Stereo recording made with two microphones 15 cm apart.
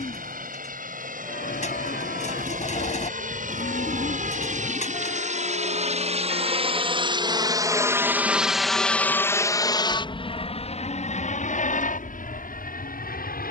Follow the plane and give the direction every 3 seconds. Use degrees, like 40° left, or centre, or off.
70° right, 60° right, 20° right, 40° left, 60° left.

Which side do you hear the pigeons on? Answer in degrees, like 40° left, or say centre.
50° left.